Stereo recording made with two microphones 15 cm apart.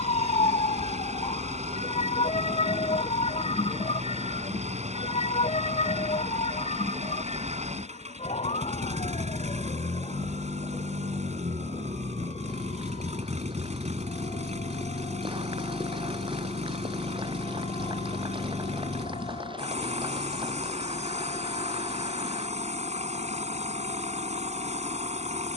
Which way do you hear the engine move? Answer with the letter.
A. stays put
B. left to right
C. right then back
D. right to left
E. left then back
A.